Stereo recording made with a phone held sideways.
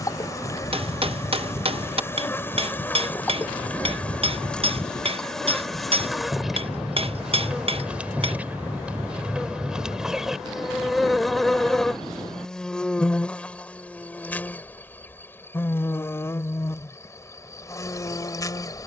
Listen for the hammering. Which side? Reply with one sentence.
In this clip you hear the hammering on the right.